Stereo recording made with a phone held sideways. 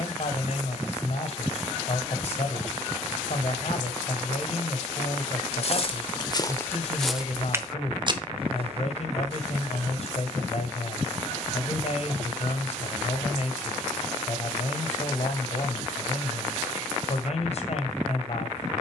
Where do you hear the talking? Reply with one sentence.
You can hear the talking on the left.